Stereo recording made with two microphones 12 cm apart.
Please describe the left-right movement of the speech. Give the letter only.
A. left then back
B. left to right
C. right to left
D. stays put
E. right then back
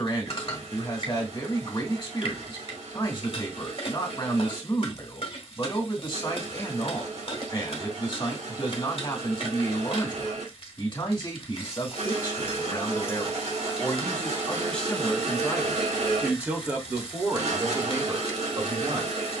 B.